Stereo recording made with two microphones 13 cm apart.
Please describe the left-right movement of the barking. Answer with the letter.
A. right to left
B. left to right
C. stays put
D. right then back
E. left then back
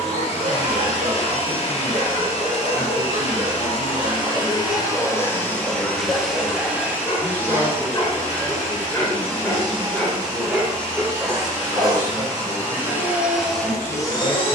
E.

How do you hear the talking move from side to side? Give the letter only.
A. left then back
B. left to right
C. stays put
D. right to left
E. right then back
A.